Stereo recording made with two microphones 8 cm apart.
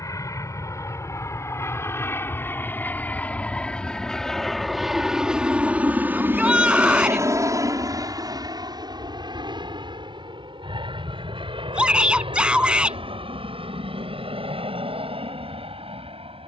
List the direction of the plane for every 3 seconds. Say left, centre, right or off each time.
left, centre, right, right, right, right.